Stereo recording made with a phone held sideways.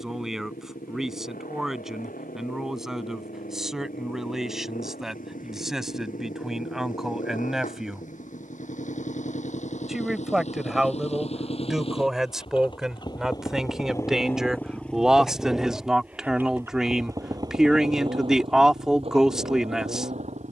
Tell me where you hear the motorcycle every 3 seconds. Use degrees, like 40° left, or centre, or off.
70° left, 70° left, 60° left, 50° left, 20° left, 10° right, 40° right.